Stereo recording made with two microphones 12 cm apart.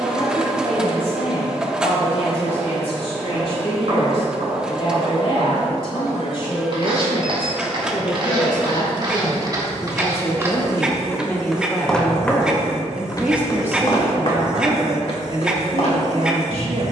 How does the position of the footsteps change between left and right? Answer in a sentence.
In this clip you hear the footsteps move to the left.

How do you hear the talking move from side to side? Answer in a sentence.
In this clip you hear the talking move from left to right.